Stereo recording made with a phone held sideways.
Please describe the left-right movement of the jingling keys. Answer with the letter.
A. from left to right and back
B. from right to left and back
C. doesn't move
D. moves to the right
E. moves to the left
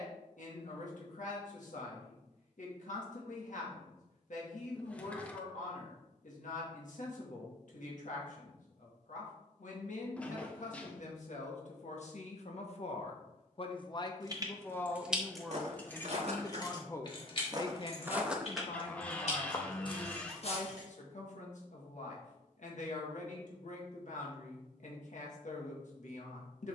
E.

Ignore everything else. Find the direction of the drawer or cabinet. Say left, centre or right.
centre.